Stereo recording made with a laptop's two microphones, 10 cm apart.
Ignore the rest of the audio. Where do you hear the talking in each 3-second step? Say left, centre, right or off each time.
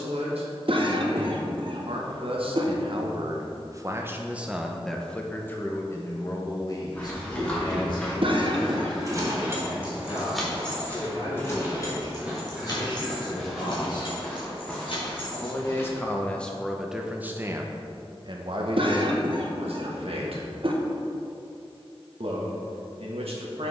right, centre, left, left, left, centre, right, right.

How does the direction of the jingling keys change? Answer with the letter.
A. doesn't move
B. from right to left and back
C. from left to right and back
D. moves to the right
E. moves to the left
E.